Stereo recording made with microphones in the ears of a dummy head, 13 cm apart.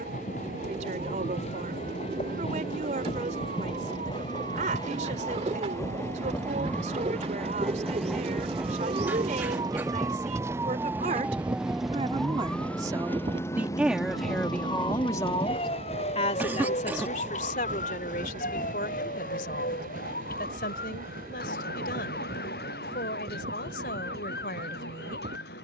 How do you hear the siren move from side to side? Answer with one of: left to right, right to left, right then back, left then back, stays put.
right to left.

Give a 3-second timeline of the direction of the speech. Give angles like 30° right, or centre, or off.
50° right, 50° right, 50° right, 50° right, 10° right, 50° left, 70° left, 70° left, 70° left.